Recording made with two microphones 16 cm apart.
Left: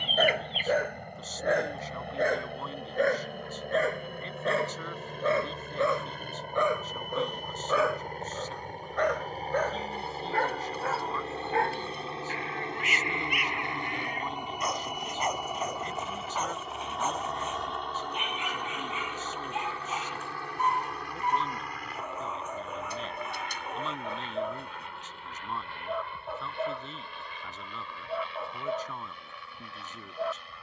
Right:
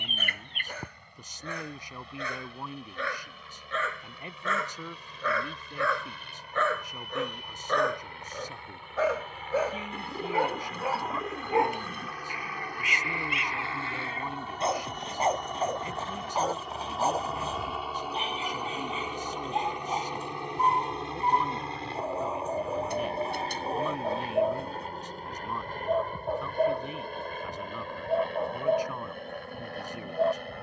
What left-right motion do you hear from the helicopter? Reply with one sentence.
In this clip you hear the helicopter move from left to right.